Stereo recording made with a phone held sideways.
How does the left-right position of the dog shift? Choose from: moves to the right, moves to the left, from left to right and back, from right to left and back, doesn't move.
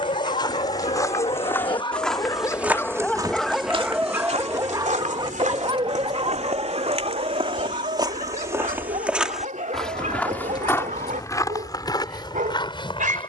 moves to the right.